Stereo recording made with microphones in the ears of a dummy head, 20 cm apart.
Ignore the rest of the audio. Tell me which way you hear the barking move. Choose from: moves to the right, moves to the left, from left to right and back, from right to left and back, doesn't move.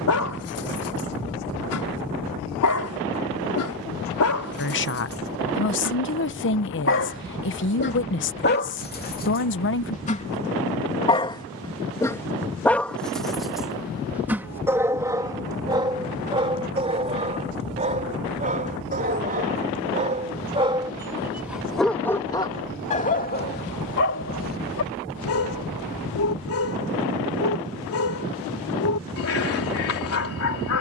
from left to right and back.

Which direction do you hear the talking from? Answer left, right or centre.
left.